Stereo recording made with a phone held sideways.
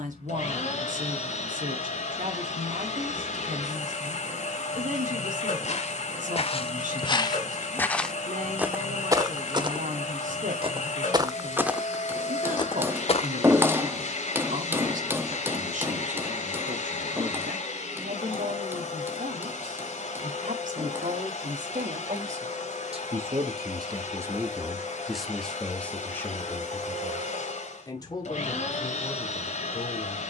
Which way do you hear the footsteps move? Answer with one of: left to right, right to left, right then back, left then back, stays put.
right then back.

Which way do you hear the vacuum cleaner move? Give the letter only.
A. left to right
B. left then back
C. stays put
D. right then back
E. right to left
C.